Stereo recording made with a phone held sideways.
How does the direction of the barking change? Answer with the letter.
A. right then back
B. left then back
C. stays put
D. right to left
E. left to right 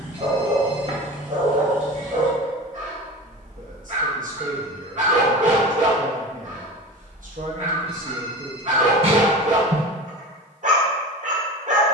C.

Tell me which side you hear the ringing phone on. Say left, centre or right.
right.